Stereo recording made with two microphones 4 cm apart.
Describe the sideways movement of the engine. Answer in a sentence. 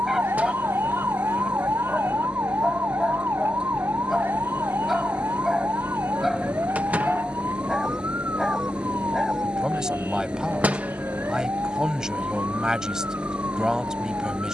In this clip you hear the engine stay in one place.